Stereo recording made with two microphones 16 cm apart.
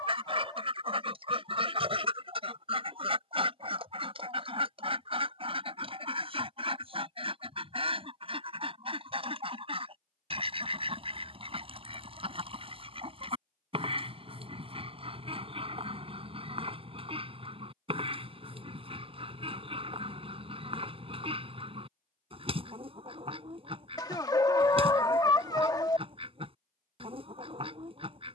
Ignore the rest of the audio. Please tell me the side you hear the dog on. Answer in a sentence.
You can hear the dog on the left.